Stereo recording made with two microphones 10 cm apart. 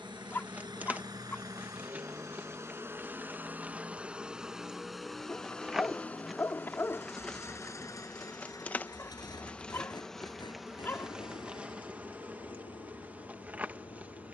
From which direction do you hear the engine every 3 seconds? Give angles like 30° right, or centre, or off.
40° right, 10° right, 30° left, 50° left, 60° left.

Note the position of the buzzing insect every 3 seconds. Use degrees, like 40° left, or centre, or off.
20° right, 10° right, 10° left, centre, 20° right.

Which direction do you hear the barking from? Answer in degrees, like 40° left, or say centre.
20° left.